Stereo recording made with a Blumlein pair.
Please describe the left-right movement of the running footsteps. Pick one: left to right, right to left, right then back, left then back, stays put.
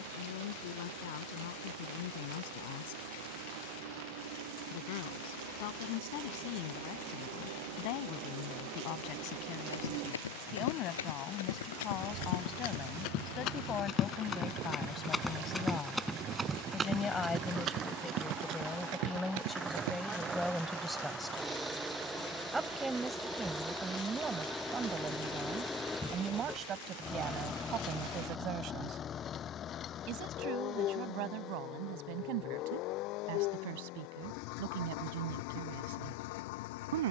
left to right.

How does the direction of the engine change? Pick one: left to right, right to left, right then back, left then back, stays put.
right to left.